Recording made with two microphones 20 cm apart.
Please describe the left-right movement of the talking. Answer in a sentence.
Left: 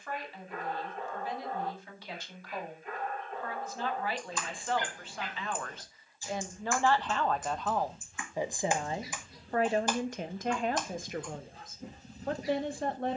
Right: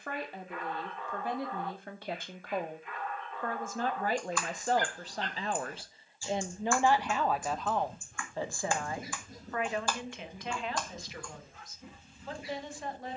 In this clip you hear the talking move from right to left.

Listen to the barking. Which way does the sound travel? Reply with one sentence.
In this clip you hear the barking go right and come back.